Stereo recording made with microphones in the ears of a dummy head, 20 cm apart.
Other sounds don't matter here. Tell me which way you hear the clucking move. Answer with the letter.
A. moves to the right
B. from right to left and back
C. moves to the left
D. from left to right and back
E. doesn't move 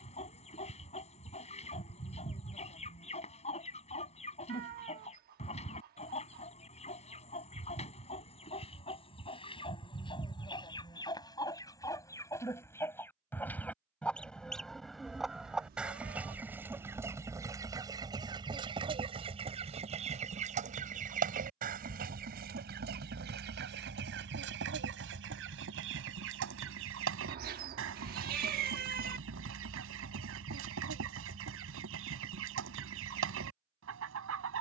A.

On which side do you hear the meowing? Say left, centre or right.
right.